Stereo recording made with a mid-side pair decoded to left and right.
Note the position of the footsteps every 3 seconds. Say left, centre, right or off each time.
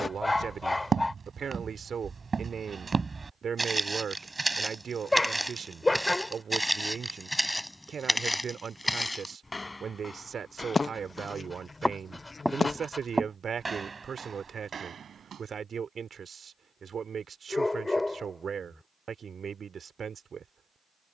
right, centre, centre, left, right, right, off.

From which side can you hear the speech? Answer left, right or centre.
right.